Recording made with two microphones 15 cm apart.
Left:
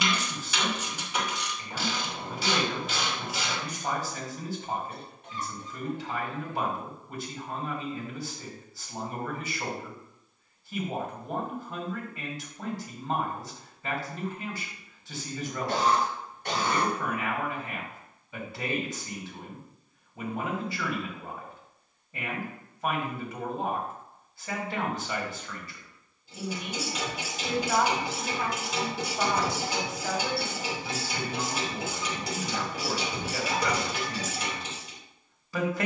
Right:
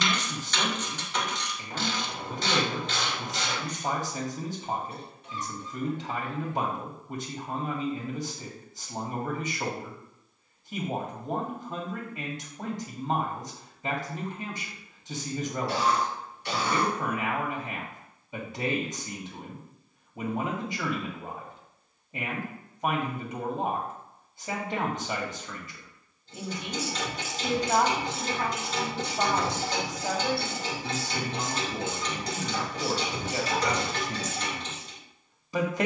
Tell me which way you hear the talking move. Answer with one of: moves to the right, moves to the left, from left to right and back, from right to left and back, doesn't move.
doesn't move.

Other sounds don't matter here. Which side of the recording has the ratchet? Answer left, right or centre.
centre.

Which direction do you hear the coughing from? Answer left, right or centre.
left.